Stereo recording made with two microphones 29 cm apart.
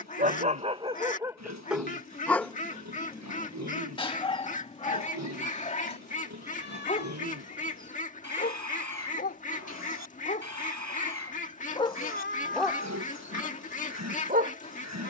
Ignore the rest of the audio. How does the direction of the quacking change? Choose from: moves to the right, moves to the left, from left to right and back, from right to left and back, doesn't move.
doesn't move.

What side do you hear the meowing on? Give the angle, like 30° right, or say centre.
40° left.